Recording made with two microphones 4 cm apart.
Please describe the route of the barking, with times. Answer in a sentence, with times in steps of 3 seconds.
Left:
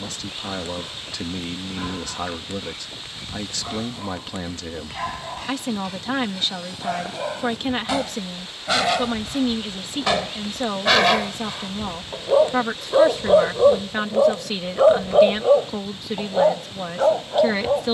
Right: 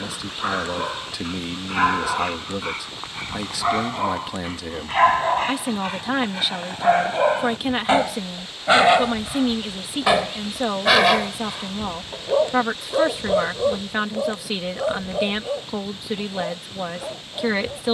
You can hear the barking on the right from 0 s, in the centre from 9 s and on the left from 12 s.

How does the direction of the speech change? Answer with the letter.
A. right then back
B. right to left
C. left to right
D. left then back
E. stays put
E.